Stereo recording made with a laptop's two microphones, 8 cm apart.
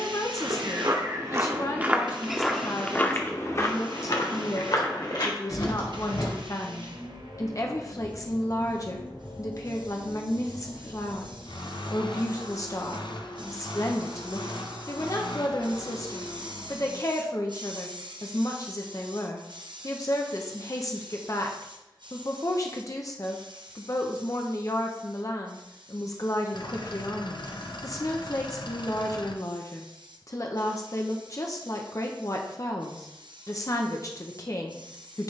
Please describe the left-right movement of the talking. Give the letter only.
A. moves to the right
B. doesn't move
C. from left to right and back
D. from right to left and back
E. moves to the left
B.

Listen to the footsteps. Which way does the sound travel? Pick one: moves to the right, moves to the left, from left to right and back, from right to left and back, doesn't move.
moves to the left.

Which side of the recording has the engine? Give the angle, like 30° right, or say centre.
70° left.